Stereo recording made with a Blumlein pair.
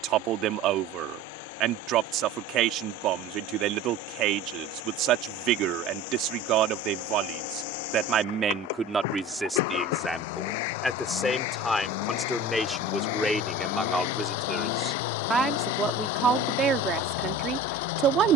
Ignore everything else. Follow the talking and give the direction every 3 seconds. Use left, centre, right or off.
right, right, right, centre, centre, right.